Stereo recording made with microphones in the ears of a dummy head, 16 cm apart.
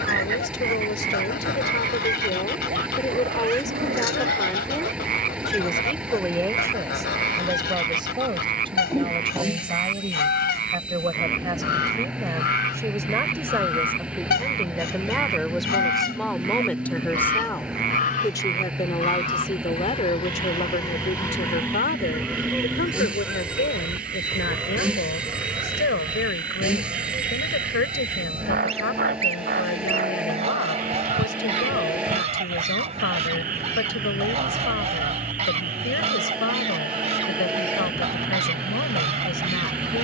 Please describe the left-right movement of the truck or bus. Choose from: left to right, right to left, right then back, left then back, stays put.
stays put.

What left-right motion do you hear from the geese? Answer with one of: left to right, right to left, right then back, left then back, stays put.
left to right.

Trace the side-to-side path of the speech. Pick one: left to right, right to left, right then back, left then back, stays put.
right then back.